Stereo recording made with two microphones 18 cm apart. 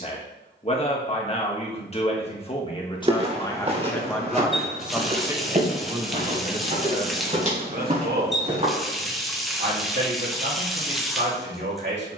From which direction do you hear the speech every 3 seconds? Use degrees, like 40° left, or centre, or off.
30° left, centre, 50° right, 70° right.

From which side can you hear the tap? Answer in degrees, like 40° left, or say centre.
centre.